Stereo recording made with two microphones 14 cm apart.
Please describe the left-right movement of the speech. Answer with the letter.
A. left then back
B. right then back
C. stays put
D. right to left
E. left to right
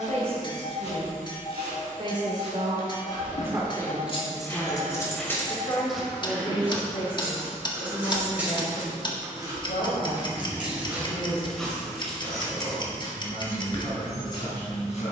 D.